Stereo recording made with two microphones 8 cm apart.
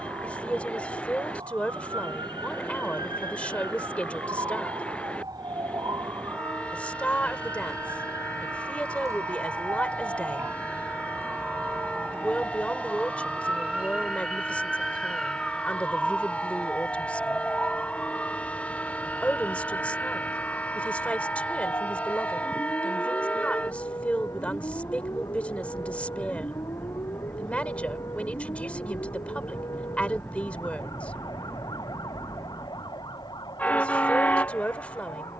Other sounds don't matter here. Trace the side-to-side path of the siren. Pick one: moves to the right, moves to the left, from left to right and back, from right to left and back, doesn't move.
moves to the left.